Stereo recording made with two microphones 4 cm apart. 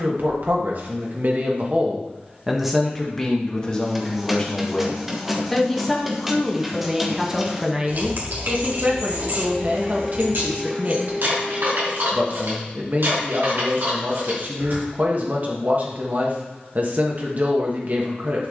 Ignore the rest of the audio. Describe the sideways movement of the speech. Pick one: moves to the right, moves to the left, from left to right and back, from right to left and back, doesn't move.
from right to left and back.